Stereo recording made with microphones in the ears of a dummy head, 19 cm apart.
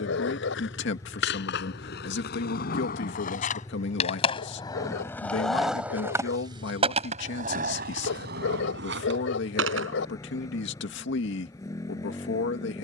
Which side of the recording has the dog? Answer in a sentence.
In this clip you hear the dog on the left.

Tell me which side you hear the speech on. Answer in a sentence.
In this clip you hear the speech on the left.